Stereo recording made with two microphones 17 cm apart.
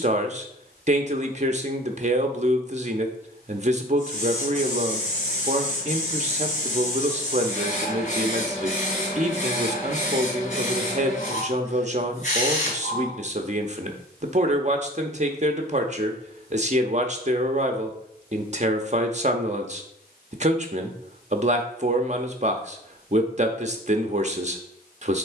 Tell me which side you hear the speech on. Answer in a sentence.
In this clip you hear the speech on the right.